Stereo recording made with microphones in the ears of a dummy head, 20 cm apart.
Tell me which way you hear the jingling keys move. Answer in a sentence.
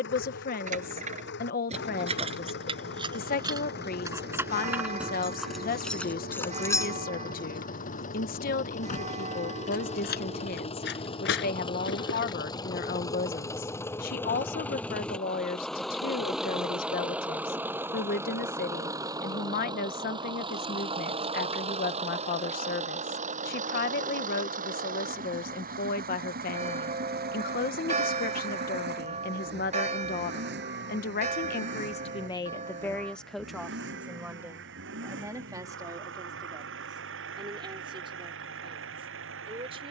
In this clip you hear the jingling keys move to the left.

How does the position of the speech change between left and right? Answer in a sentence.
You can hear the speech go from the left side to the right.